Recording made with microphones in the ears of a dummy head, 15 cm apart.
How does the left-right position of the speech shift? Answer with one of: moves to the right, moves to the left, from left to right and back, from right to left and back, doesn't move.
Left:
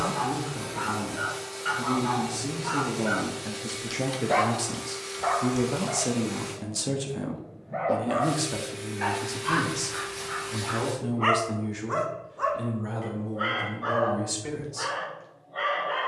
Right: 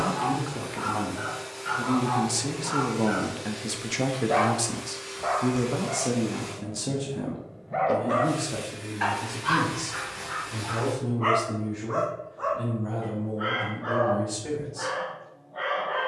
moves to the left.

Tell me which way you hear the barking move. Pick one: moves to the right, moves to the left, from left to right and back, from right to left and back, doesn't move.
from left to right and back.